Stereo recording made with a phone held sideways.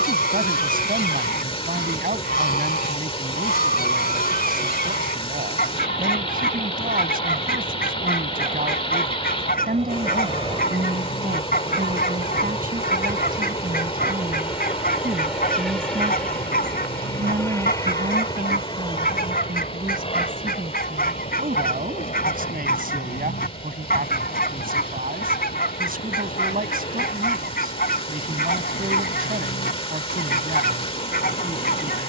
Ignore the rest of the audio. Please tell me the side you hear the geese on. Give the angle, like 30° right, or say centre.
70° left.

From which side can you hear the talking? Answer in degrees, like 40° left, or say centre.
70° right.